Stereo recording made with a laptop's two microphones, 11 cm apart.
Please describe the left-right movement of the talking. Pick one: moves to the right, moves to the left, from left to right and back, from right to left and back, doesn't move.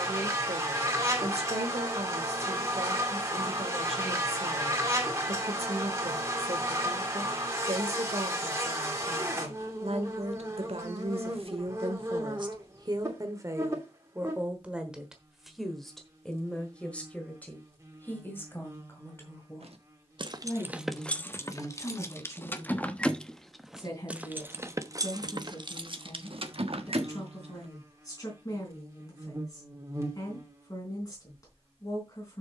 moves to the left.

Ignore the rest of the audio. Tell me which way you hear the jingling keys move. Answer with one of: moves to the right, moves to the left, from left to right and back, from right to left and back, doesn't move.
from right to left and back.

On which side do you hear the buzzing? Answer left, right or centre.
right.